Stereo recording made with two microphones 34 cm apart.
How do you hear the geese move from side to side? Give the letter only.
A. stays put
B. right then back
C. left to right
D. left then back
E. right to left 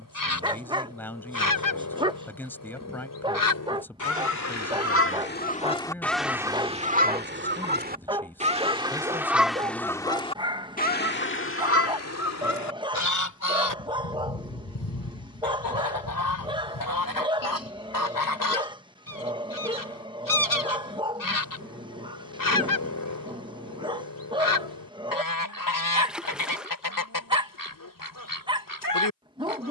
B.